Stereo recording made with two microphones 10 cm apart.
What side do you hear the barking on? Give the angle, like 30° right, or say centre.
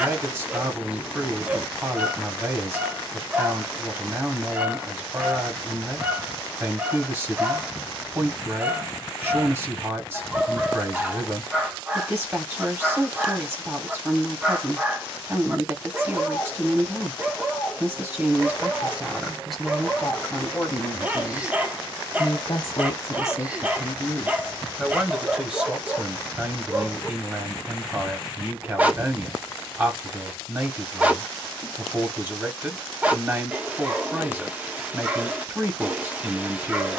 20° right.